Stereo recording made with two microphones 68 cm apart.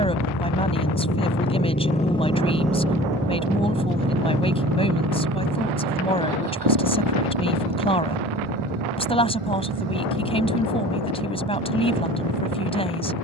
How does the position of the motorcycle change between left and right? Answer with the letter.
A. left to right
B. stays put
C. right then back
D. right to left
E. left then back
A.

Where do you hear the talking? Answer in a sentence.
You can hear the talking in the centre.